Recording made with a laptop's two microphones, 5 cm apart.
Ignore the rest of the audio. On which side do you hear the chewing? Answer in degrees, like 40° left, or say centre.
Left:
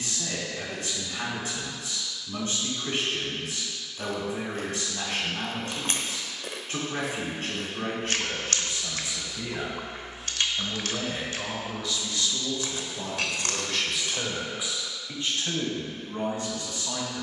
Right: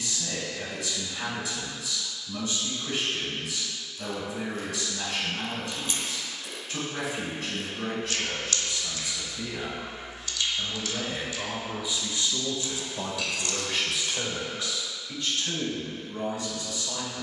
50° left.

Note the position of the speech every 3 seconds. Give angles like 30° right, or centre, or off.
40° left, 40° left, 40° left, 10° left, 20° right, 40° left.